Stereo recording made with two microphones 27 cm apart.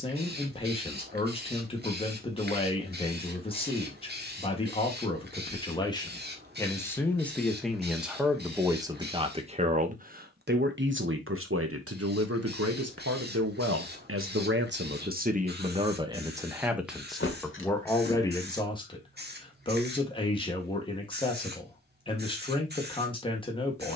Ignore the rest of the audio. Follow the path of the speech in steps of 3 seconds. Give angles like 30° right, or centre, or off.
20° left, 20° left, centre, 40° right, 60° right, 10° right, 20° left, 20° left.